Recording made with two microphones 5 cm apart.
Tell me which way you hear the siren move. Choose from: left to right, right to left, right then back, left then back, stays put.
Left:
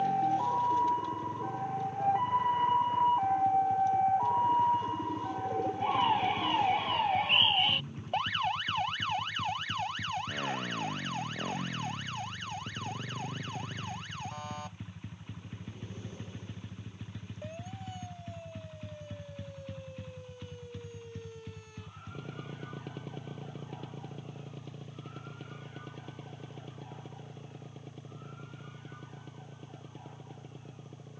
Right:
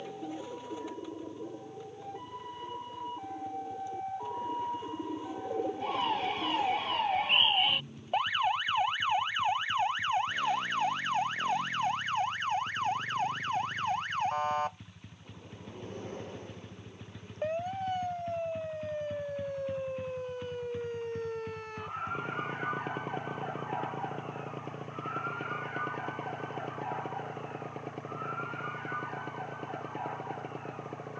left to right.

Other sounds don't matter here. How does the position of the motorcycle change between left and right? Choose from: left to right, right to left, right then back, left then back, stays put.
left to right.